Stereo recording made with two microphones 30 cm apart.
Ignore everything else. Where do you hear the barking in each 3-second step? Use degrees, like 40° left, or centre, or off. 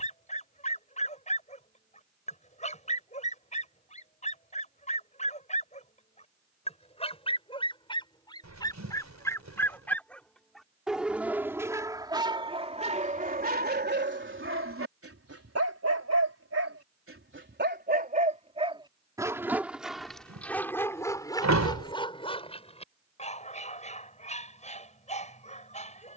20° left, 20° left, 20° left, centre, 30° right, 50° right, 10° right, 20° left, 20° left.